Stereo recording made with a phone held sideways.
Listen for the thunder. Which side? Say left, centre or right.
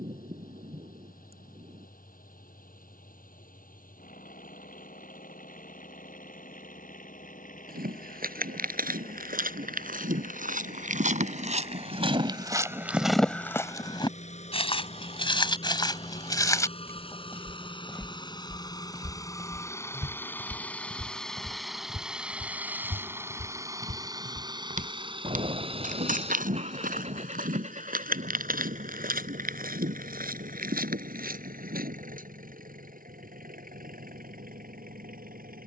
right.